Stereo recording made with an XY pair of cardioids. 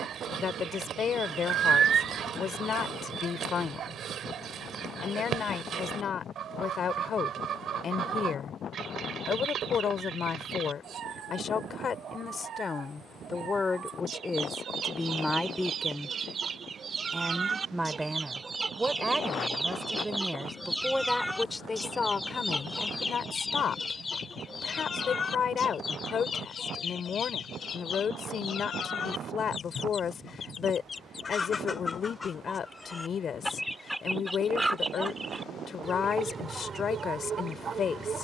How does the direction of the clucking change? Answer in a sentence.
In this clip you hear the clucking go left and come back.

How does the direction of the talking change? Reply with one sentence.
You can hear the talking go right and come back.